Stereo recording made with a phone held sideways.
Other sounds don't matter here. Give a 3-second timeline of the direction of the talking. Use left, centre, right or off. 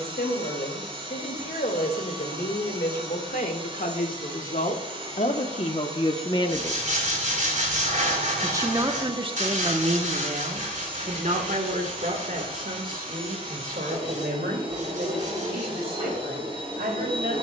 left, left, centre, right, right, right.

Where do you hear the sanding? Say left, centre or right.
right.